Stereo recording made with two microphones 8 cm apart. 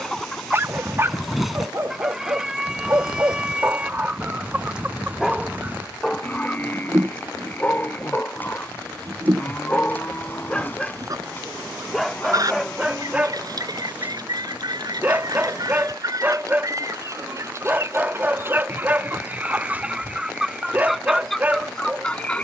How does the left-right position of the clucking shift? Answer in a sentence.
You can hear the clucking go right and come back.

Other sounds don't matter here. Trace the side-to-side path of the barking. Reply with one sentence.
You can hear the barking go left and come back.